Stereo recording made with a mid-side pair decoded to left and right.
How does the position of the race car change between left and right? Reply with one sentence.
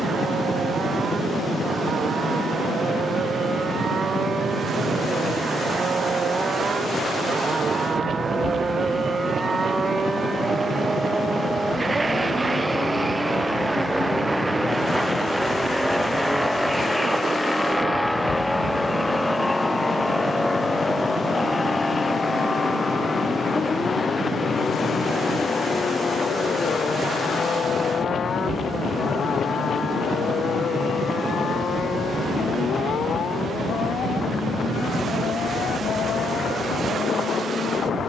You can hear the race car move to the left.